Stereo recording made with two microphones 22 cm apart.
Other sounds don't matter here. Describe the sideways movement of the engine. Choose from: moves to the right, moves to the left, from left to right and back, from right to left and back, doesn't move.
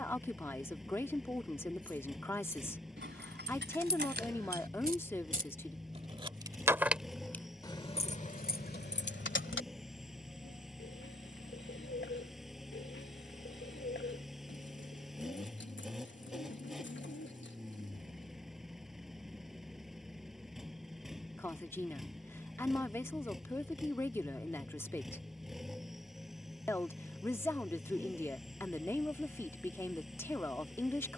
doesn't move.